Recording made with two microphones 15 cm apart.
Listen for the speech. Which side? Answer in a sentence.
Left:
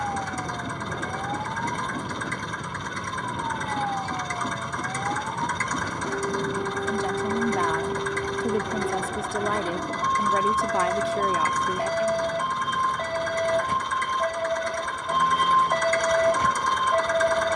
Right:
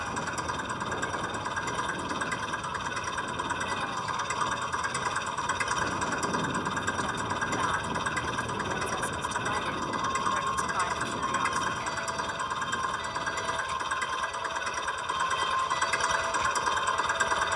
You can hear the speech on the left.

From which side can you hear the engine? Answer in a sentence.
In this clip you hear the engine in the centre.